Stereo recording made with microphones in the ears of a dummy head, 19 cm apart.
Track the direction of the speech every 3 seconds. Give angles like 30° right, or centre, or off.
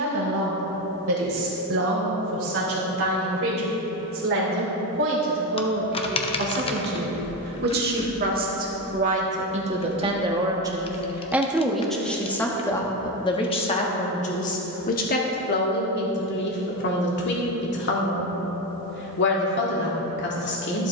70° right, 60° right, 50° right, 20° right, 20° left, 50° left, 50° left.